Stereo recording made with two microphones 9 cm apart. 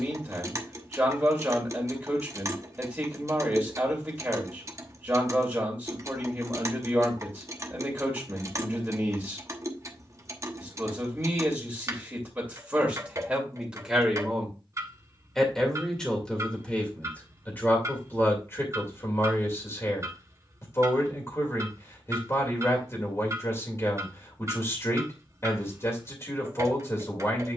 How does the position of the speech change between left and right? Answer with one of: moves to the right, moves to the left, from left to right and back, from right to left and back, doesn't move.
moves to the left.